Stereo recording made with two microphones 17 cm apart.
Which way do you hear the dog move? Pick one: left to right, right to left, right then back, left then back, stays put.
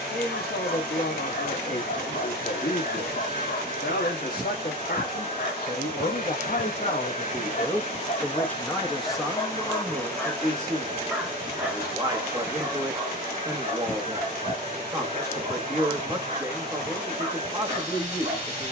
left to right.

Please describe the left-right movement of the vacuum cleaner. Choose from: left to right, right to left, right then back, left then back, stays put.
stays put.